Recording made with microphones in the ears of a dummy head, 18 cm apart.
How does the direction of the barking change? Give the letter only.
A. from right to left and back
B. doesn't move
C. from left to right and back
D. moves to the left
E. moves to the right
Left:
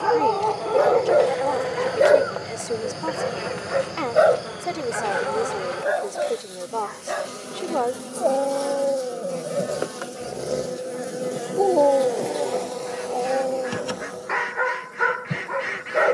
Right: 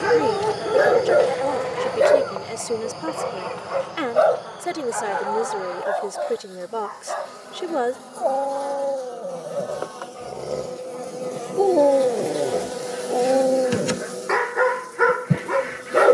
A.